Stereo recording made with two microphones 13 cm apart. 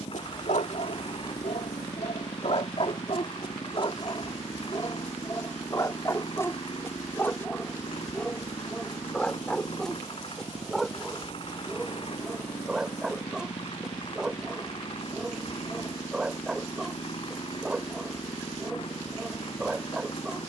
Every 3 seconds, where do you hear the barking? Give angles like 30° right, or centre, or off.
60° left, 30° left, 10° left, centre, centre, 10° right, 10° right.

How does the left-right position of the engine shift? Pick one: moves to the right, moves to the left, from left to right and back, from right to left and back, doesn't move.
doesn't move.